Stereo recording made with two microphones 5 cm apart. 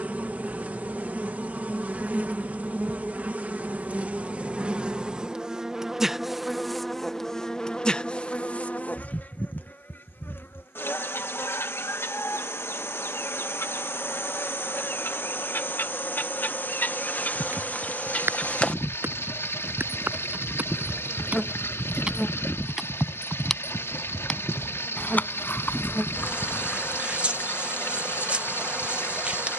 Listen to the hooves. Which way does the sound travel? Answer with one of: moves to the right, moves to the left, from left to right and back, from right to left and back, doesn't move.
moves to the left.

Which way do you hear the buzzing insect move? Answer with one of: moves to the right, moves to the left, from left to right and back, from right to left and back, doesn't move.
from right to left and back.